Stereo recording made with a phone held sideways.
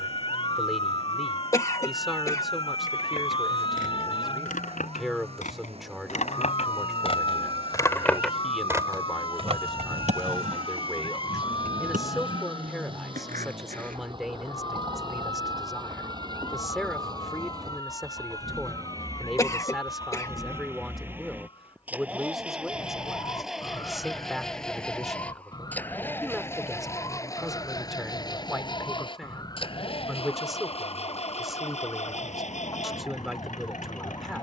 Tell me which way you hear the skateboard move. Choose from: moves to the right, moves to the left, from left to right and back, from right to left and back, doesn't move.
moves to the right.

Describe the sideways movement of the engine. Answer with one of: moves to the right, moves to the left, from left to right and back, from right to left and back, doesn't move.
moves to the left.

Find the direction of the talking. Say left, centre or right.
centre.